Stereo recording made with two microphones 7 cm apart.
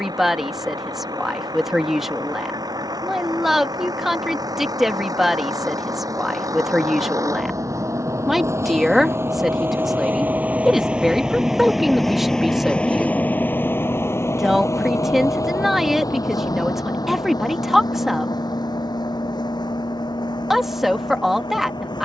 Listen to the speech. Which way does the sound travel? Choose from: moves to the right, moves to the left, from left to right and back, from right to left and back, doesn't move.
doesn't move.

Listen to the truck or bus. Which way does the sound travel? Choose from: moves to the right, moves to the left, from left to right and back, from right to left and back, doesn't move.
moves to the left.